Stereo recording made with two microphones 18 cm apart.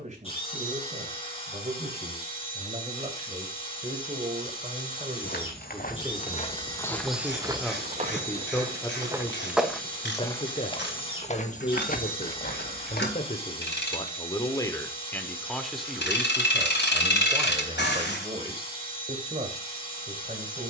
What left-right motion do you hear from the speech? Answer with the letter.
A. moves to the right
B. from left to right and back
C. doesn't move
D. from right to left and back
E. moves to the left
D.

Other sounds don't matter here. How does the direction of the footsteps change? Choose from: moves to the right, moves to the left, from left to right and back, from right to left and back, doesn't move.
from left to right and back.